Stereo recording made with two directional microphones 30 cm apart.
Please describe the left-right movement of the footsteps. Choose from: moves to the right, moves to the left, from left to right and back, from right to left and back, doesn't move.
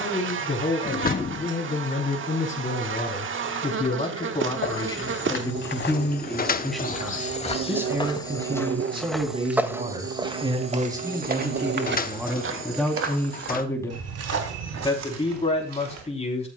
moves to the right.